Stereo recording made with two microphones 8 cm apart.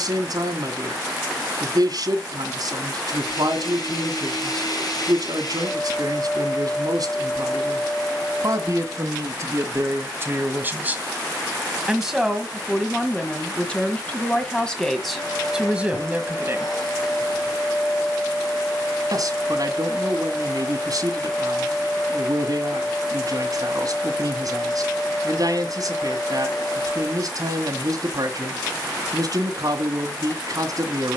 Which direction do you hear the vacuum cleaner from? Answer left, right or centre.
left.